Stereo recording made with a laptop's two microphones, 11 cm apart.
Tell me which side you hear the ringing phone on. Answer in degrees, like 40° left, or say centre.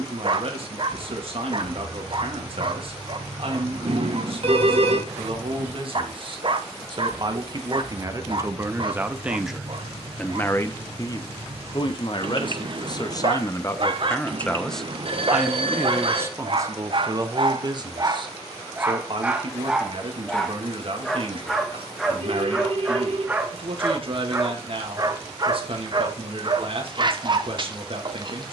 60° right.